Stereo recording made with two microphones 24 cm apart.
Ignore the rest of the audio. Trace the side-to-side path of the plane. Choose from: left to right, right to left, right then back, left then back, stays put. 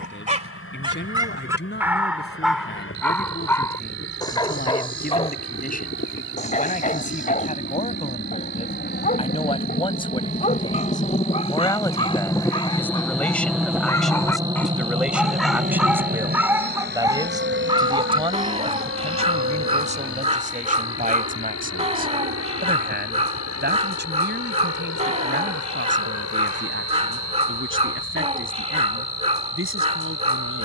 left to right.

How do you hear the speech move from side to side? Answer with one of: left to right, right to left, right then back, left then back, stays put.
left to right.